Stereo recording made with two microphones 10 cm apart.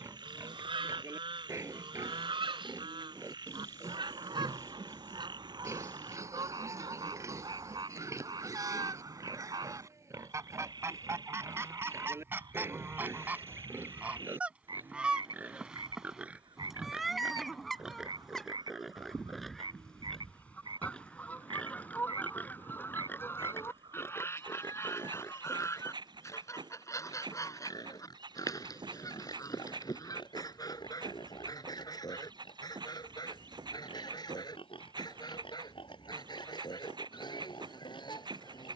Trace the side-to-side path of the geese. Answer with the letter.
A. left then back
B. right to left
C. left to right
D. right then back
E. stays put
B.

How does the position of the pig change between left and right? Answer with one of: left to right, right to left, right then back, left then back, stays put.
right to left.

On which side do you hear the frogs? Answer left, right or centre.
right.